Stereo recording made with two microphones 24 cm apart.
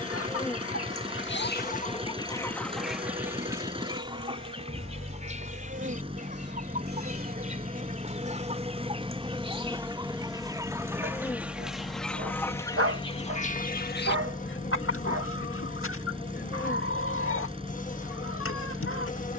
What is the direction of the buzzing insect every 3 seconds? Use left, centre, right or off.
centre, right, right, centre, left, left, left.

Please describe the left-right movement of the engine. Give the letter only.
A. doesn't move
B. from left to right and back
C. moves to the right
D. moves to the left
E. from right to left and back
A.